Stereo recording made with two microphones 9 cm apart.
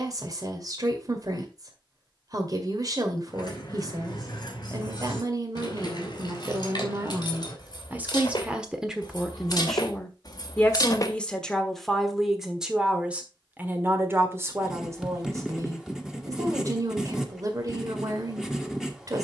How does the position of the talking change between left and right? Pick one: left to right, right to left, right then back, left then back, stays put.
left then back.